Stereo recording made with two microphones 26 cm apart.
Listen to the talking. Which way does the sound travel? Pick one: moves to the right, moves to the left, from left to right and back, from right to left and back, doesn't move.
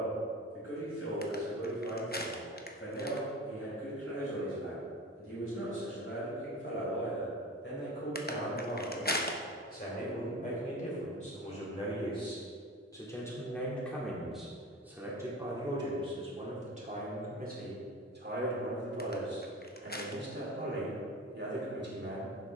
moves to the right.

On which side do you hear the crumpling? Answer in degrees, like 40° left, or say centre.
40° left.